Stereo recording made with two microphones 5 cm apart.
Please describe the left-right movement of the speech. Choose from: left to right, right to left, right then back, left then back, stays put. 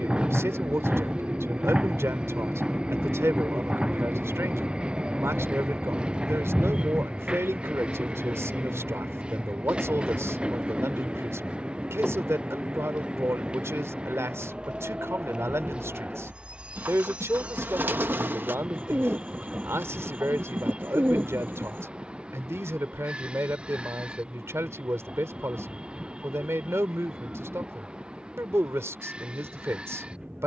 stays put.